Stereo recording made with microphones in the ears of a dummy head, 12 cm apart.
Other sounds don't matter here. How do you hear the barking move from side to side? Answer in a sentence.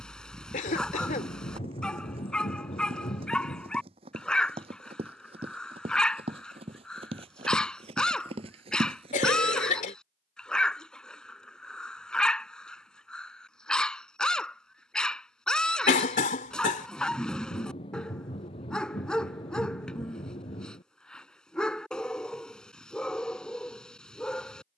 You can hear the barking stay put.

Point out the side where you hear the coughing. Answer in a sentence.
In this clip you hear the coughing on the left.